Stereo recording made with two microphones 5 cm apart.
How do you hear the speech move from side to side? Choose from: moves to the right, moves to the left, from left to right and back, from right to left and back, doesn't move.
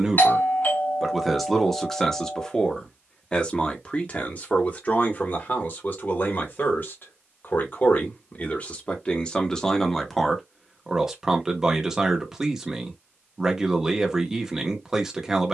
from right to left and back.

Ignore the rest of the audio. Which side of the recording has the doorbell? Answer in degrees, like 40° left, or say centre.
40° left.